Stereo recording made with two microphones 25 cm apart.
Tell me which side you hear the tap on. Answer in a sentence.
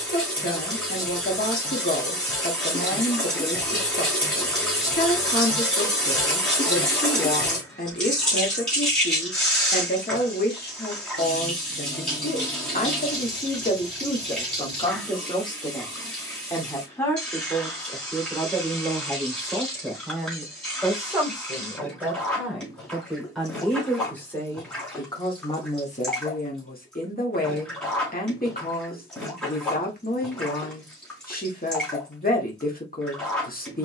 In this clip you hear the tap in the centre.